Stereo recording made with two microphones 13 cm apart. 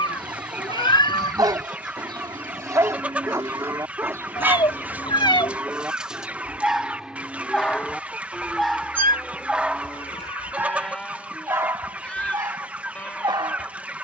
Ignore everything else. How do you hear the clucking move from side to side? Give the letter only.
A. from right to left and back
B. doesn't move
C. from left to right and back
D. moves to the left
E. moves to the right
B.